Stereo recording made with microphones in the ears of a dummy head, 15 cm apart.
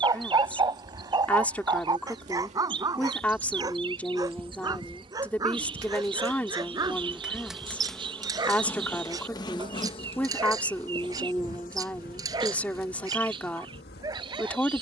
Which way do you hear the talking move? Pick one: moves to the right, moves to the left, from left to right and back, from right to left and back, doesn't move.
doesn't move.